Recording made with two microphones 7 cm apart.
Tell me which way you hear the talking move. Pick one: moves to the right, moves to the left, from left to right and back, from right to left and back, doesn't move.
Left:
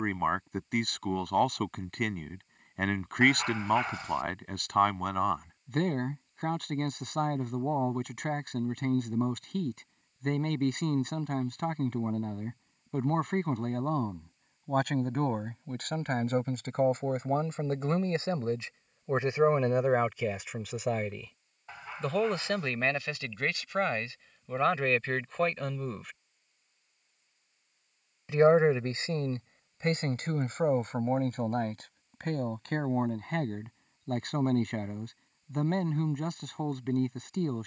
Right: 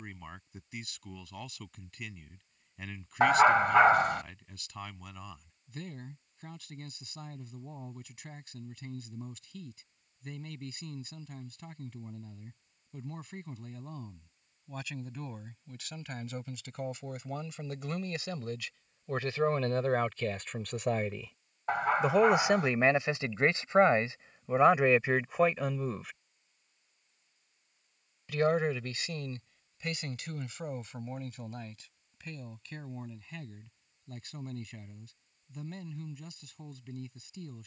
from left to right and back.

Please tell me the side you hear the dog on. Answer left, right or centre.
right.